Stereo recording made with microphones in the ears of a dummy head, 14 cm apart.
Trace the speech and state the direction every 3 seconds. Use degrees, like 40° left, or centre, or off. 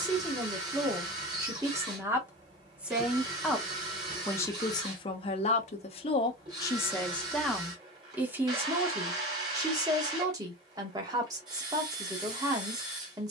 20° right, 20° left, centre, 20° right, 20° right.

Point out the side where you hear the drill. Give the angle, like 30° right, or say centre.
30° right.